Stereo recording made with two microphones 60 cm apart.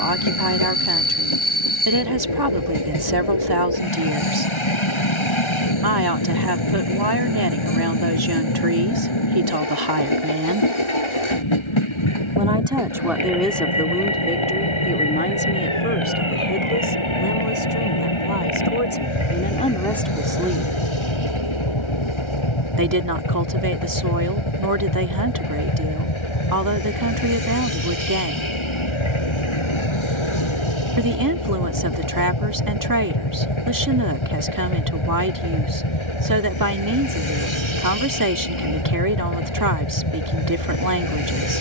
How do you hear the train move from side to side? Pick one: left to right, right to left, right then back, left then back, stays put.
stays put.